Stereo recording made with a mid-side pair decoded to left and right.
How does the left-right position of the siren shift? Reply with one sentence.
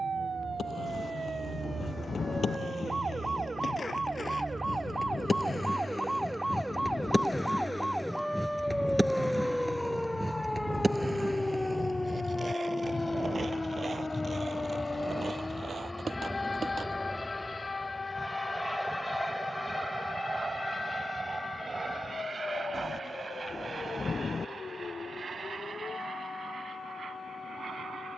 In this clip you hear the siren move to the left.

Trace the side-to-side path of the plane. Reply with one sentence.
You can hear the plane move to the right.